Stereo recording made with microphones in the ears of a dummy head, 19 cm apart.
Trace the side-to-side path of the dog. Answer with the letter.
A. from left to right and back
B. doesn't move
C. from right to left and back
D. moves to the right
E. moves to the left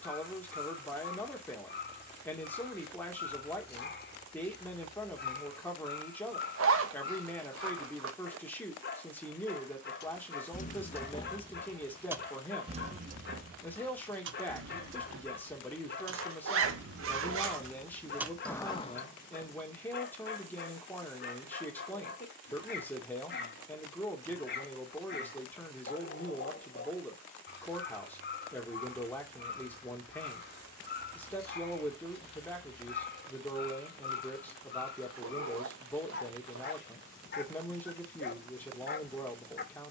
B.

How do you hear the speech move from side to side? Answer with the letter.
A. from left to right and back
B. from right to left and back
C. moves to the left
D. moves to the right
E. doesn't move
E.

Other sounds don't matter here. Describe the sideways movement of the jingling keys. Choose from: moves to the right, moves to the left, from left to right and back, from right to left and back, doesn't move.
from left to right and back.